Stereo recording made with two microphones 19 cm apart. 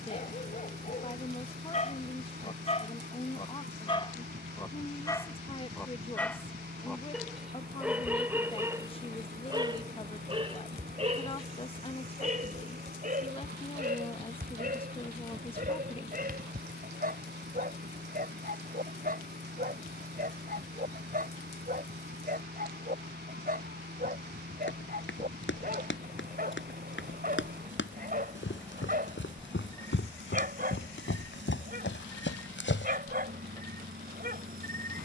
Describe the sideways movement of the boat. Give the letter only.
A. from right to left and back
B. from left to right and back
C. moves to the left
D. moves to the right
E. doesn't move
E.